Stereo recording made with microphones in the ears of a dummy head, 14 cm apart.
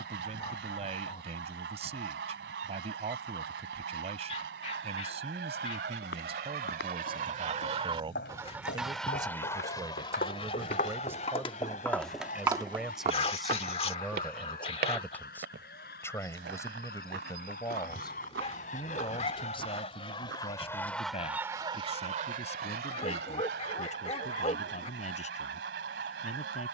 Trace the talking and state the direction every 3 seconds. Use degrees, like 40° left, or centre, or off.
40° right, 40° right, 40° right, 20° right, centre, 20° left, 40° left, 50° left, 50° left.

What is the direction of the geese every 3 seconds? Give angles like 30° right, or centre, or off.
80° right, 80° right, 40° right, 30° left, 60° left, 60° left, 40° left, 50° right, 80° right.